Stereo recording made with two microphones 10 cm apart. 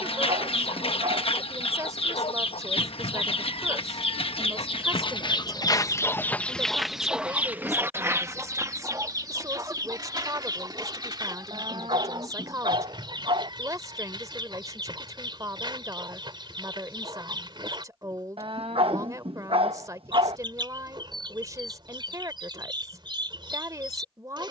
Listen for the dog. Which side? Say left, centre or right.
right.